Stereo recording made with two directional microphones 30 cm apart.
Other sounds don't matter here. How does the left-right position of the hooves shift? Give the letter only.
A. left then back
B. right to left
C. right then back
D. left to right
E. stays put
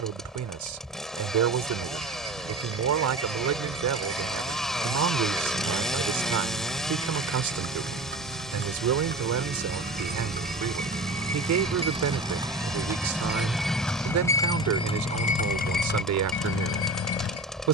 B.